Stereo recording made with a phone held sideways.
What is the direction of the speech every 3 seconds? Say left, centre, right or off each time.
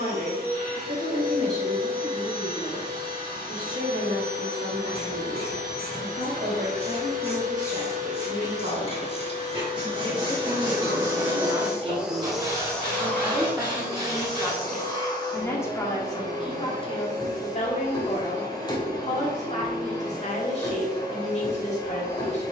right, right, right, right, centre, left, left, left.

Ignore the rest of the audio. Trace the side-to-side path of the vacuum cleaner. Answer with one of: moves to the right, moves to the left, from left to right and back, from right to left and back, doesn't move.
moves to the left.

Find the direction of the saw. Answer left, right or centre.
right.